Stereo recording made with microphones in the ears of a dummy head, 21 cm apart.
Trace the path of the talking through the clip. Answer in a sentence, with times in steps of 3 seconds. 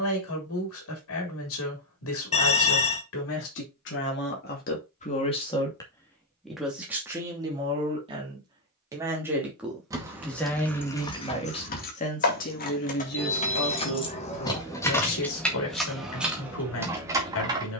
In this clip you hear the talking on the left from 0 s, in the centre from 6 s and on the left from 12 s.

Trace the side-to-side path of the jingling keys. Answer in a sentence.
In this clip you hear the jingling keys move from right to left and back again.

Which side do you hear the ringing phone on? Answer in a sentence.
You can hear the ringing phone on the left.